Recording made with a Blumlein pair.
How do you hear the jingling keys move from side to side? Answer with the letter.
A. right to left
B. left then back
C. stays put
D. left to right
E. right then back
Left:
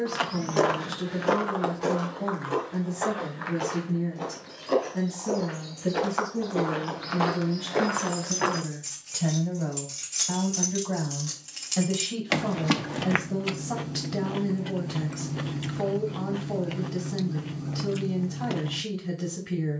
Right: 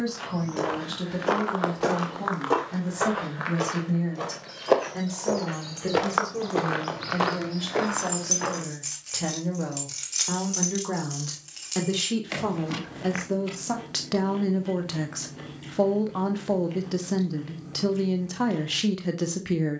A.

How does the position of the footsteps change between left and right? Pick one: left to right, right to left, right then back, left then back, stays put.
right then back.